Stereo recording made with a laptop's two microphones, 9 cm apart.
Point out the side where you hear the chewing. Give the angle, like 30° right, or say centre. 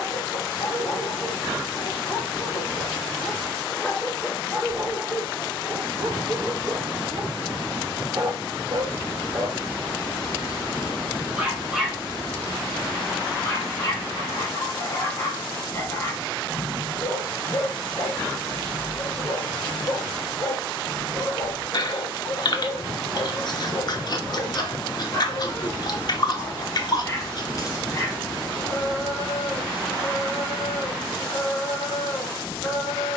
50° left.